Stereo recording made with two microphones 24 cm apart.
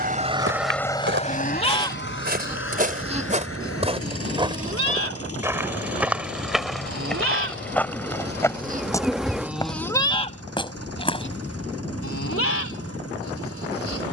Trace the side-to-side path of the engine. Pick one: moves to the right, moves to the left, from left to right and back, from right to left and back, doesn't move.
moves to the left.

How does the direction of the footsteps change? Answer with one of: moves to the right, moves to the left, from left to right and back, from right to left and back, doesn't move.
moves to the left.